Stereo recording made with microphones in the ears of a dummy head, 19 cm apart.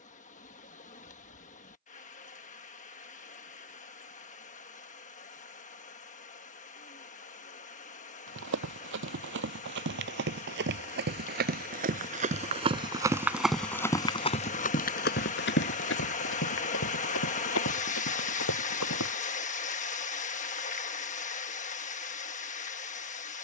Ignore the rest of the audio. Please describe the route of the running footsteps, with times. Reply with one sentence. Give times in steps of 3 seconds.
You can hear the running footsteps not at all from 0 s, on the right from 6 s, in the centre from 12 s, on the left from 15 s and not at all from 21 s.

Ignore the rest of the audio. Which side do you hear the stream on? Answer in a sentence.
You can hear the stream on the left.